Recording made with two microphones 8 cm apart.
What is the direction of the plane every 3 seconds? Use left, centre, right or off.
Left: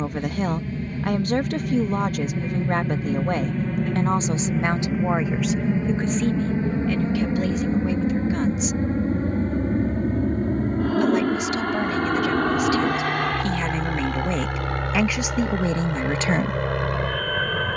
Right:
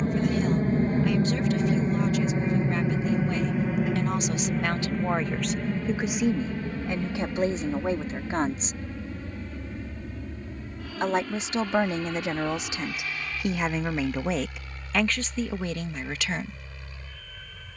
right, centre, left, left, left, left.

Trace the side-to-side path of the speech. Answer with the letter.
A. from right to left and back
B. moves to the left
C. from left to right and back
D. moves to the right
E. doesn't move
C.